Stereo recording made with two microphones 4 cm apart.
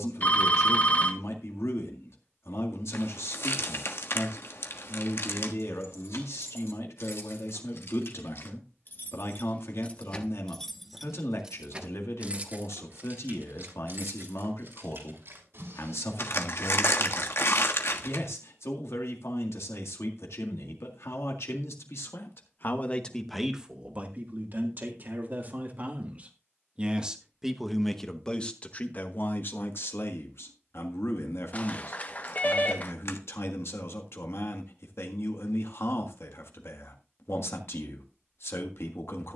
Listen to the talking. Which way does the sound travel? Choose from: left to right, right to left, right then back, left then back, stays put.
right then back.